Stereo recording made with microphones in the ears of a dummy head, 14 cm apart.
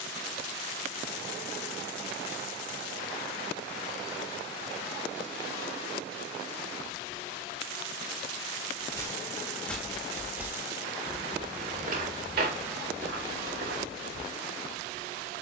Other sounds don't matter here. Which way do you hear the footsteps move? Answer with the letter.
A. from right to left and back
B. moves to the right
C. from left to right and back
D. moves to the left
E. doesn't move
B.